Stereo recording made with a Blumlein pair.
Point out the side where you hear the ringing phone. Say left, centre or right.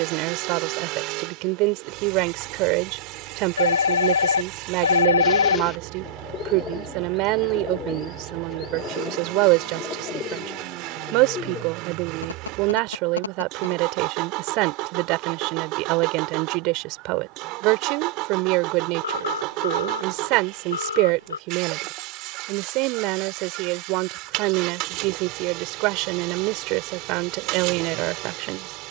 left.